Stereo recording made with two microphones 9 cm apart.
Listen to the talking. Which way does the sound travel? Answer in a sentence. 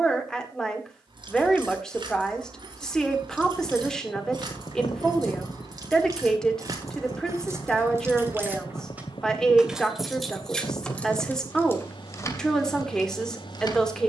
You can hear the talking stay put.